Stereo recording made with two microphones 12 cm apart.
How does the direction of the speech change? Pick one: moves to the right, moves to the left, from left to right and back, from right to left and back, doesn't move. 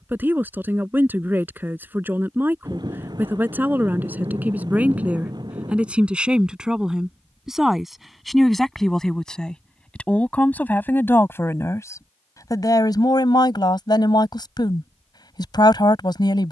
moves to the left.